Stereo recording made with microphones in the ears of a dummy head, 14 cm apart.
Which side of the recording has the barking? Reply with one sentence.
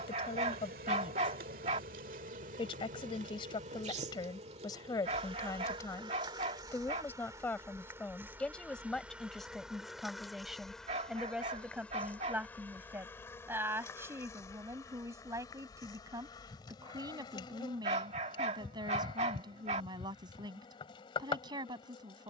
In this clip you hear the barking on the right.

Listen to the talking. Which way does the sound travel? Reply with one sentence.
In this clip you hear the talking move to the right.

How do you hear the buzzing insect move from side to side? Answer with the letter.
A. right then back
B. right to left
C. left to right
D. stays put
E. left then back
B.